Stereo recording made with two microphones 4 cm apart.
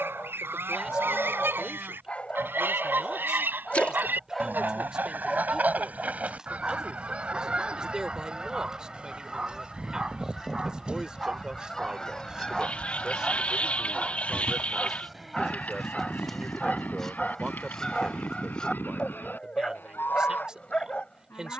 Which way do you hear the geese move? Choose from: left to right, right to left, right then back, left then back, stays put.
right to left.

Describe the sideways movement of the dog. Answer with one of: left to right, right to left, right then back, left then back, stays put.
right then back.